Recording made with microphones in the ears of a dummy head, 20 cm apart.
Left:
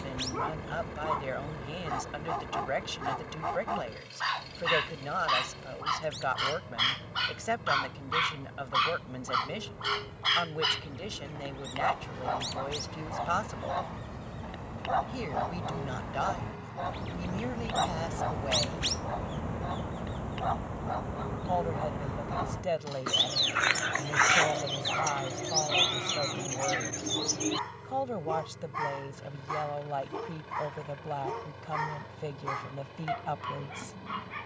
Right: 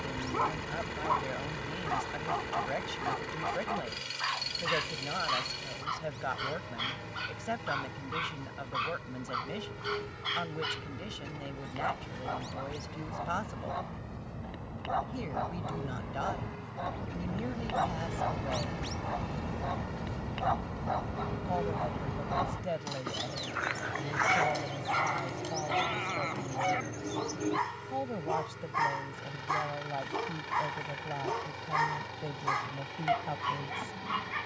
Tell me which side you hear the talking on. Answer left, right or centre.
left.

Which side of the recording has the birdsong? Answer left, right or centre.
left.